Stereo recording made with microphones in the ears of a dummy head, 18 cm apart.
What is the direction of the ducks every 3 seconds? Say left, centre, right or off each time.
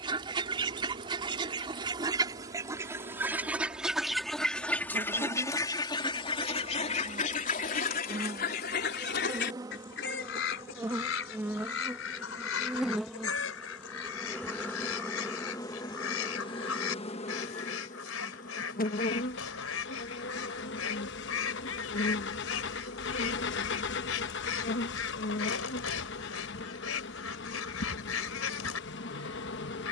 right, centre, left, left, left, left, left, left, left, left.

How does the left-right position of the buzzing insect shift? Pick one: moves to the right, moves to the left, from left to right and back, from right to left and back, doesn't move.
moves to the left.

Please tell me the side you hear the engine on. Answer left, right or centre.
left.